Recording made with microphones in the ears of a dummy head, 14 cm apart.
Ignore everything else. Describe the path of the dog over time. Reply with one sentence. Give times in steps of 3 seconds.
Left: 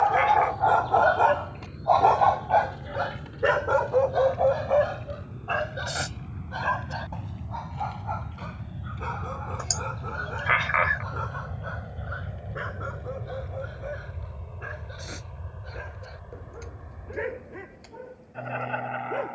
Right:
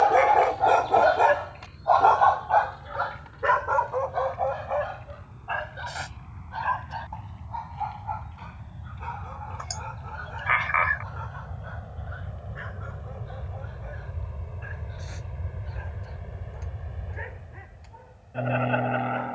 You can hear the dog in the centre from 0 s and on the left from 3 s.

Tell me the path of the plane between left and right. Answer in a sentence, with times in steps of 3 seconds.
In this clip you hear the plane on the left from 0 s, in the centre from 12 s and on the right from 15 s.